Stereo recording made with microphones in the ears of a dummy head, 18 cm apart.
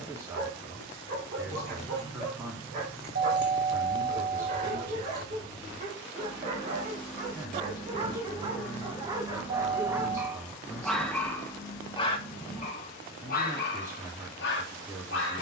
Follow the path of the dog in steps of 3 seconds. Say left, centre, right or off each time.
right, right, right, centre, left.